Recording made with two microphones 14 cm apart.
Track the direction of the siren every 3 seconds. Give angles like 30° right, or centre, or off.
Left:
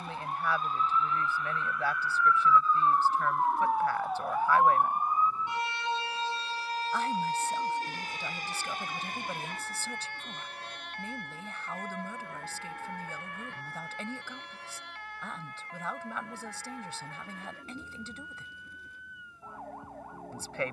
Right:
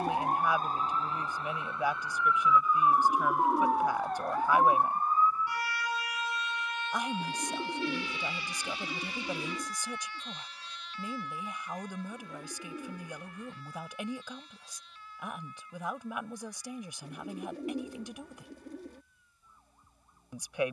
30° right, 10° left, 40° left, 50° left, 60° left, 60° left, 60° left.